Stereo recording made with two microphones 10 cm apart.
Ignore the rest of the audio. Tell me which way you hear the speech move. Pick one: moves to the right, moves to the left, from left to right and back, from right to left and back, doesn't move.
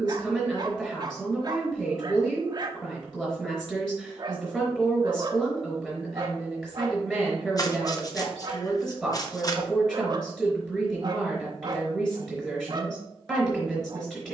doesn't move.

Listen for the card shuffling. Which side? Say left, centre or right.
left.